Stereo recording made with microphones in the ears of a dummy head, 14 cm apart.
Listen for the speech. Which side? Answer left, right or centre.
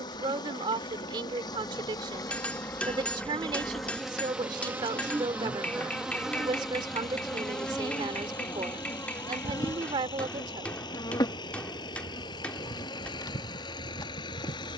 right.